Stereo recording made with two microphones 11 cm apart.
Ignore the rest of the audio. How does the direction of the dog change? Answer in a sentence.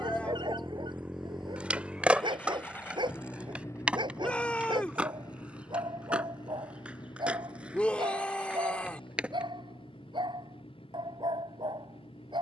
You can hear the dog stay in one place.